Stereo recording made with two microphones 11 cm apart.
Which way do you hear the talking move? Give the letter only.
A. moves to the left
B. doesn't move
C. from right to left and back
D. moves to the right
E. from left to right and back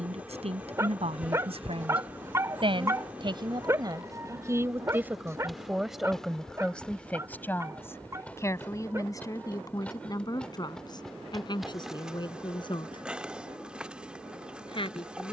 A.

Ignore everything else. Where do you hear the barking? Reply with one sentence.
You can hear the barking on the right.